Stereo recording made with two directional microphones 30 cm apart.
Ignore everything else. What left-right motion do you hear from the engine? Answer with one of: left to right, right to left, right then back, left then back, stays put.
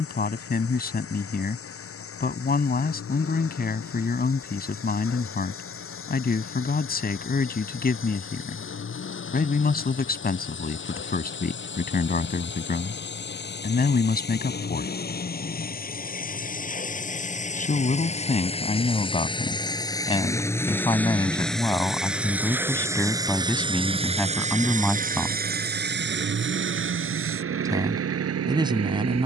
left to right.